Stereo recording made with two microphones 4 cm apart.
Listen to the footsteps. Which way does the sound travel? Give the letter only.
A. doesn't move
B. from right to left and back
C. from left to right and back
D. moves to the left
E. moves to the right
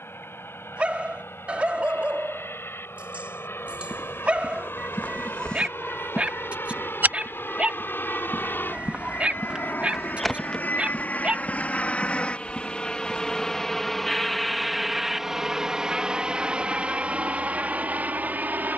C.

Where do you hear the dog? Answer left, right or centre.
right.